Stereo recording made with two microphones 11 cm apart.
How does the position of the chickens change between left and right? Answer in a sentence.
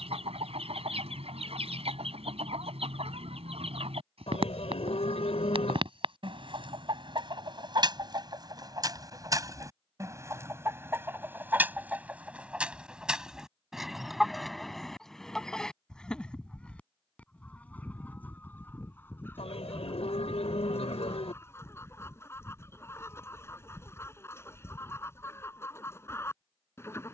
In this clip you hear the chickens go from the right side to the left.